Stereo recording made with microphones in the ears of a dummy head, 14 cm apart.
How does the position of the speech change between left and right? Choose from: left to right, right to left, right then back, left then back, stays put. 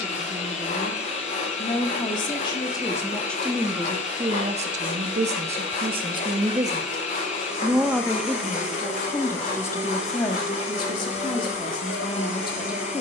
right then back.